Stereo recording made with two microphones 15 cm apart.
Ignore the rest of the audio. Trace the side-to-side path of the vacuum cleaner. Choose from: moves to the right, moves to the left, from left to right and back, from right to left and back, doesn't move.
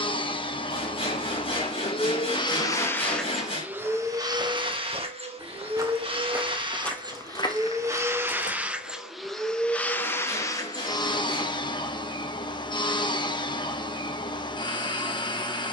from left to right and back.